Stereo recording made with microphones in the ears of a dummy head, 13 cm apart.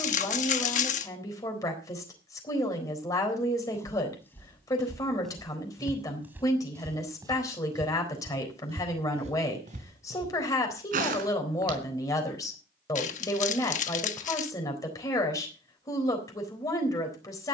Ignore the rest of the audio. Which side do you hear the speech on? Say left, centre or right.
left.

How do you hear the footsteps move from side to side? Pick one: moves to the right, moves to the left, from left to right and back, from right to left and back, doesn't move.
moves to the right.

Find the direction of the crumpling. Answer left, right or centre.
left.